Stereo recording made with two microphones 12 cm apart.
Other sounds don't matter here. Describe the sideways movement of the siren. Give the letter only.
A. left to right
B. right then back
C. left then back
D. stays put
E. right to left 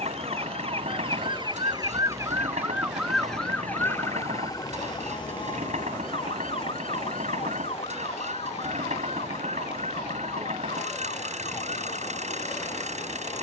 E.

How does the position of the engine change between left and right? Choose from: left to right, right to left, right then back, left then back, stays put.
stays put.